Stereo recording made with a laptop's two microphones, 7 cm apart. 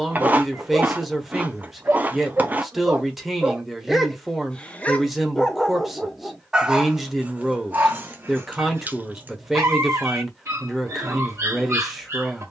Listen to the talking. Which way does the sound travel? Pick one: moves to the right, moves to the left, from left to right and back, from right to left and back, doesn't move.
doesn't move.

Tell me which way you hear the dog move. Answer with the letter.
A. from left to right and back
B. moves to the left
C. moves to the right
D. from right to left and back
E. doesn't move
D.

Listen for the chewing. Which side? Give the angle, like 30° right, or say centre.
20° right.